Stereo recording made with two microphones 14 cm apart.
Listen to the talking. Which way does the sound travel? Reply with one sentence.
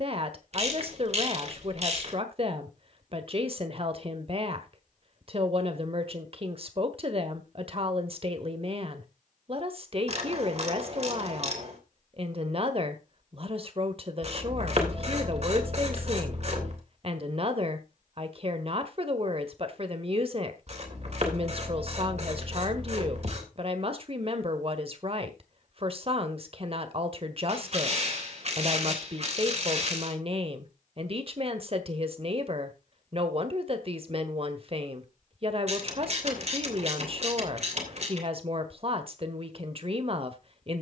You can hear the talking stay in one place.